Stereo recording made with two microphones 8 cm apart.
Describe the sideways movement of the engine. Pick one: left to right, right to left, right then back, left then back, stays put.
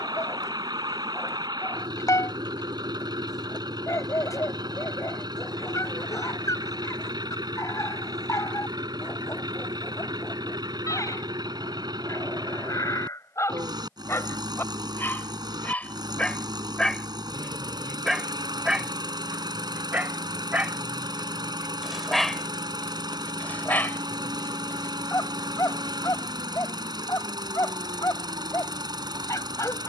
stays put.